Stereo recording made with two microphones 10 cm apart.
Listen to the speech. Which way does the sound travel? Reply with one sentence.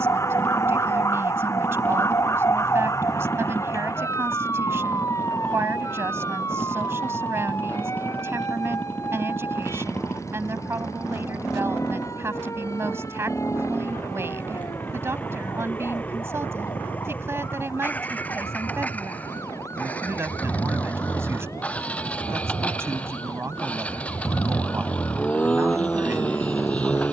You can hear the speech stay in one place.